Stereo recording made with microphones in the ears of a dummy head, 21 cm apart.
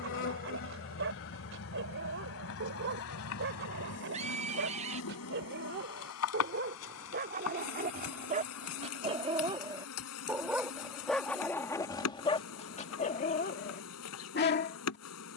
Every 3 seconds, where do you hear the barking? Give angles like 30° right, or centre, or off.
60° right, 60° right, 40° right, centre, 40° left.